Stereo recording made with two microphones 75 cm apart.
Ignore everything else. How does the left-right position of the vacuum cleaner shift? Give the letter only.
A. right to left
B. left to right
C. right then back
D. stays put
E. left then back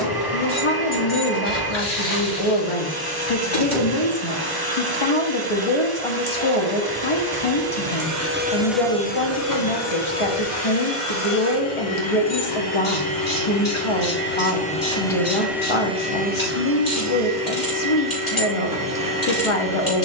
E.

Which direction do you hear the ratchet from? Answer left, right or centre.
left.